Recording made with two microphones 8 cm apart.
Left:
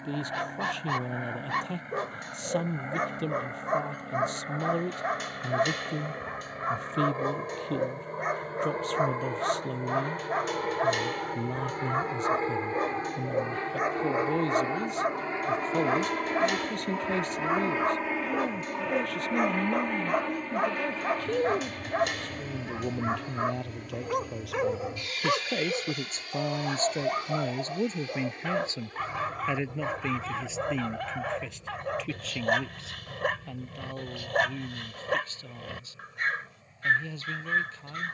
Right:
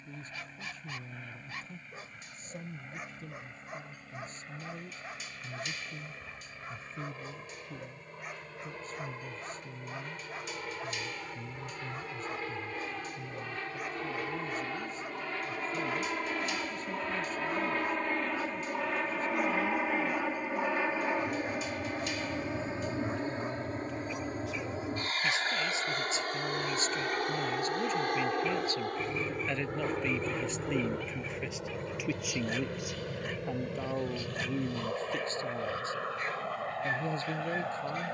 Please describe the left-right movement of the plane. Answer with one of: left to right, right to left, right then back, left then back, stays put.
left to right.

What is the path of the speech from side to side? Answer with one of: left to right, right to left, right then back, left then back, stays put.
left to right.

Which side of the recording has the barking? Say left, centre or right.
left.